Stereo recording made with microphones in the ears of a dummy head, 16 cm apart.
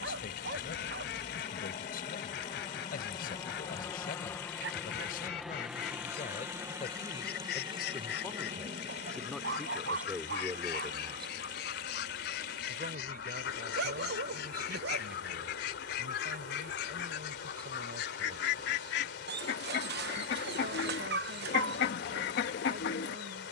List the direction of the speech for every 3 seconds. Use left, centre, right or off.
left, left, left, centre, right, right, right, right.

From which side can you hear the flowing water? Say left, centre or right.
left.